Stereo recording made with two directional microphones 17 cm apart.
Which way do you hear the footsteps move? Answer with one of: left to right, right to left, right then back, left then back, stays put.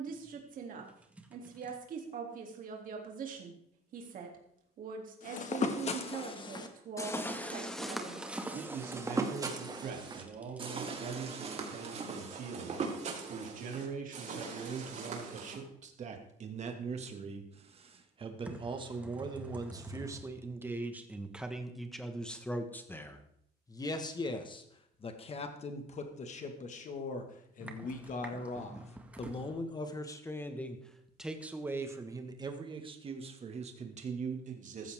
left to right.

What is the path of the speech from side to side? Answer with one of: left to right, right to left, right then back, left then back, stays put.
left then back.